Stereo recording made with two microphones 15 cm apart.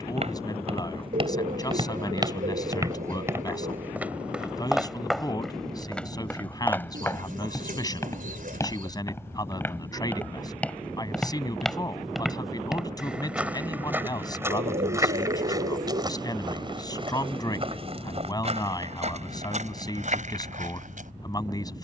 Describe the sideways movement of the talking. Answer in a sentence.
In this clip you hear the talking stay in one place.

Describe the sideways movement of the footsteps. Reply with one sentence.
You can hear the footsteps go left and come back.